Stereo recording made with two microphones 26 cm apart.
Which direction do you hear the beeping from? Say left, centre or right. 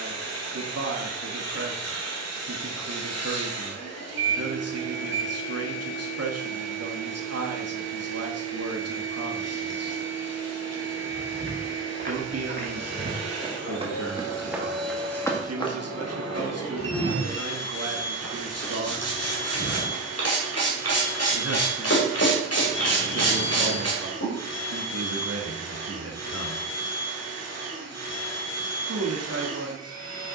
right.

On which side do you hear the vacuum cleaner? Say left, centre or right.
left.